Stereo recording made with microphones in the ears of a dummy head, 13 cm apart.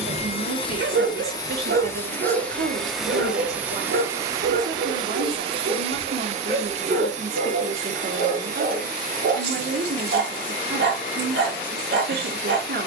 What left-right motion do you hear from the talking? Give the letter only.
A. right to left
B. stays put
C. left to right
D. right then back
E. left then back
B.